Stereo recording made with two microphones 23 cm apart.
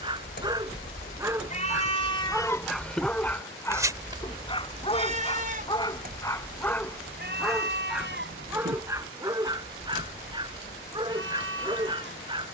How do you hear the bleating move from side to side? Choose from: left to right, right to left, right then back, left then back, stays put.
left to right.